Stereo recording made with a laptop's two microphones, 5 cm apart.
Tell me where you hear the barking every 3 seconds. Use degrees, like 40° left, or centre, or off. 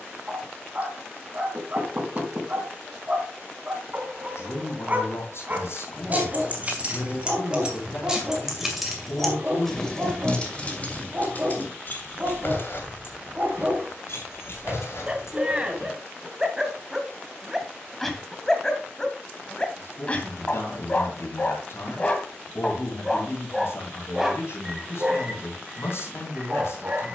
30° right, 30° right, 30° right, 30° right, 30° right, 10° right, 20° left, 20° left, 20° right.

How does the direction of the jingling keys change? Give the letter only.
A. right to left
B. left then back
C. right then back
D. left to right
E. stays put
A.